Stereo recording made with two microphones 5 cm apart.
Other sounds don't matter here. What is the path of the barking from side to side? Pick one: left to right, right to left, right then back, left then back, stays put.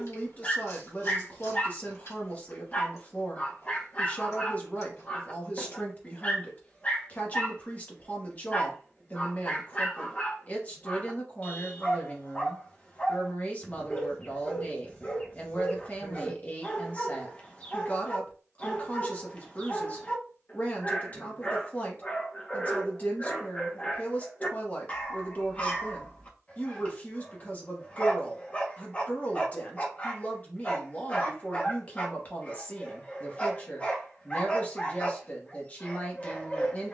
stays put.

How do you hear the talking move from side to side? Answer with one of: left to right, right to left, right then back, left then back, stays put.
stays put.